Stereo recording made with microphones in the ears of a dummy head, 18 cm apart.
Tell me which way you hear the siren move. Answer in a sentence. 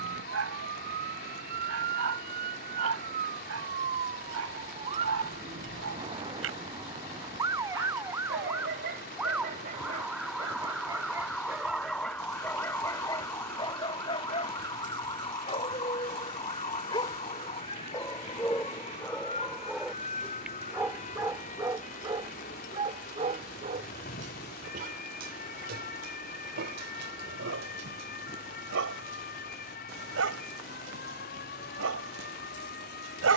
In this clip you hear the siren travel towards the left.